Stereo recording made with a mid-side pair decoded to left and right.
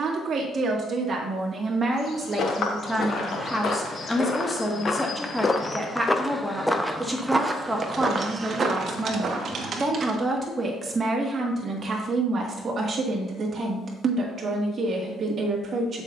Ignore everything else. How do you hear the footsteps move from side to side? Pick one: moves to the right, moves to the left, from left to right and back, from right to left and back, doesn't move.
moves to the right.